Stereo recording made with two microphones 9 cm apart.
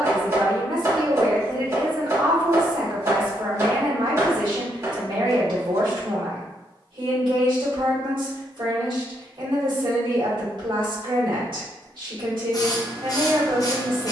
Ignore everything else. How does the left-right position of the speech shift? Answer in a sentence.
In this clip you hear the speech stay in one place.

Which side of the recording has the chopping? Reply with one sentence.
You can hear the chopping on the right.